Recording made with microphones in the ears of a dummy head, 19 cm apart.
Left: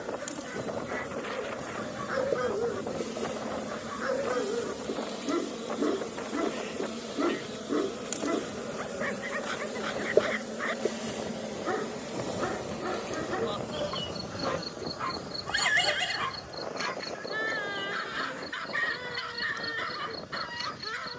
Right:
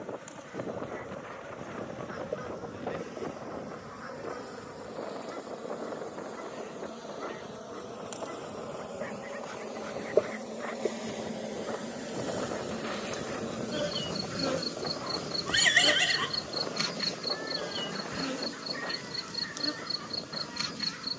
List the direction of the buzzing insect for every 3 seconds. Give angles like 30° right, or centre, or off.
50° left, 40° left, 30° left, 10° left, 20° right, 50° right, 60° right.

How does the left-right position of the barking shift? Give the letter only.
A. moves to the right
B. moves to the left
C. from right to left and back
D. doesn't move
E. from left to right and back
D.